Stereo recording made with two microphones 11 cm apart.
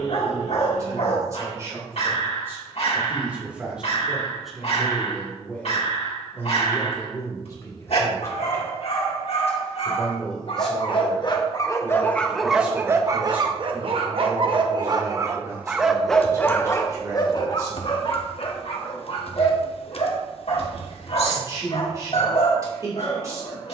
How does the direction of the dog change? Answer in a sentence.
You can hear the dog move from left to right and back again.